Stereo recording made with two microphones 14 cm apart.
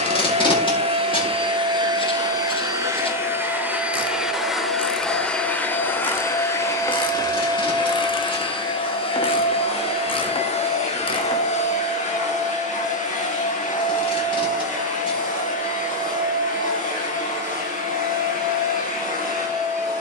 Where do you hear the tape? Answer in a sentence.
You can hear the tape on the left.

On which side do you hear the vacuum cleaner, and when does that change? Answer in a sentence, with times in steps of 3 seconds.
In this clip you hear the vacuum cleaner on the right from 0 s, in the centre from 3 s and on the left from 6 s.